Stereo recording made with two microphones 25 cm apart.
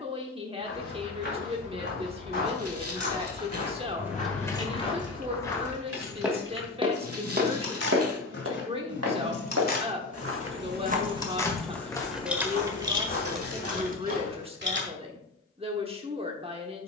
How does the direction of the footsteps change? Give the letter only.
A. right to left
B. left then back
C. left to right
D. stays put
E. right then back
E.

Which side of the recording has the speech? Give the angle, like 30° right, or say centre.
20° right.